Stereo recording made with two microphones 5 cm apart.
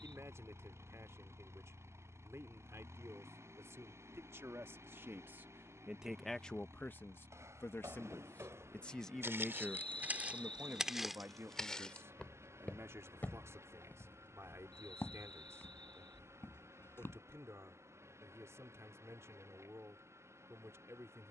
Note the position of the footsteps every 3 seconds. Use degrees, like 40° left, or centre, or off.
off, off, 70° right, 20° right, 40° left, 50° left, off.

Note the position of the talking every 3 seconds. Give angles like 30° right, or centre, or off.
70° right, 60° right, 30° left, 40° right, 70° right, 70° right, 70° right.